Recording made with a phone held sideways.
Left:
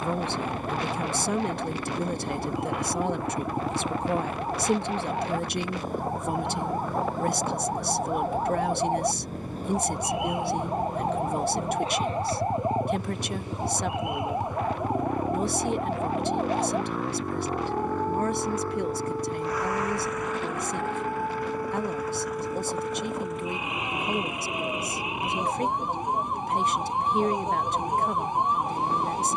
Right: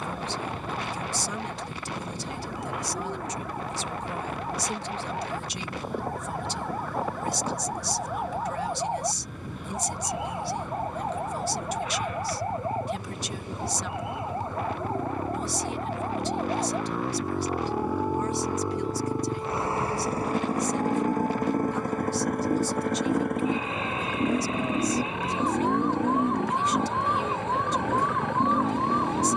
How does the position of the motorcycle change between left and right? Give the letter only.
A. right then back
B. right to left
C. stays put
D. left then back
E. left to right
E.